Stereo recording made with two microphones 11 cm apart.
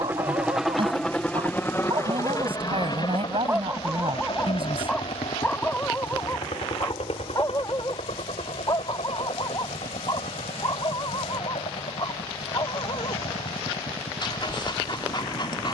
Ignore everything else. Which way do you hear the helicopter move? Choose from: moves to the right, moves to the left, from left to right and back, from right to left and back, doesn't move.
moves to the left.